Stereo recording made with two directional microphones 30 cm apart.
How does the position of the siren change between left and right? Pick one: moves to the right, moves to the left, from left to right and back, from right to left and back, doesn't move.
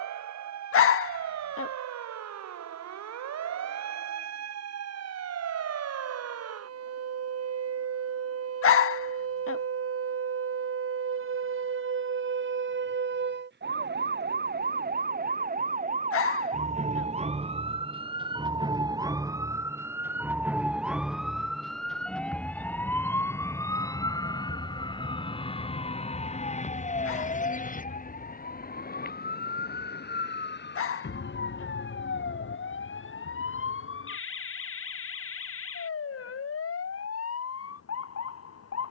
moves to the left.